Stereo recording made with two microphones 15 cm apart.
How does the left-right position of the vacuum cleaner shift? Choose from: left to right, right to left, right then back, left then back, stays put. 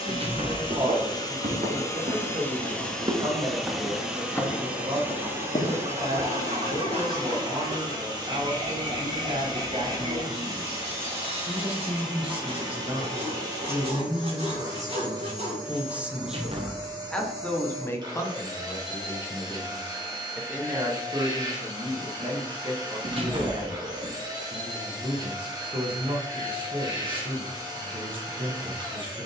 left to right.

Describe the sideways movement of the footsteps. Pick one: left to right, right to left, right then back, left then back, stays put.
right to left.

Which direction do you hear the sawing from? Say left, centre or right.
right.